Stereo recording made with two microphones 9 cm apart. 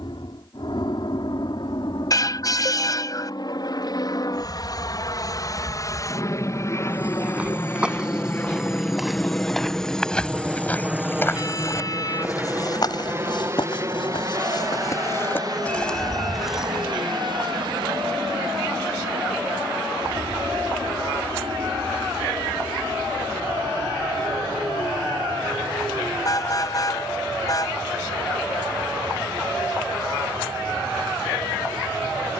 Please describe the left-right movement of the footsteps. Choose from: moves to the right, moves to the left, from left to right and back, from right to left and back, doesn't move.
from right to left and back.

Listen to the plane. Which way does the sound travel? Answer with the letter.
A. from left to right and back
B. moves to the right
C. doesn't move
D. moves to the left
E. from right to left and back
B.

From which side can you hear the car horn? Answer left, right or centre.
left.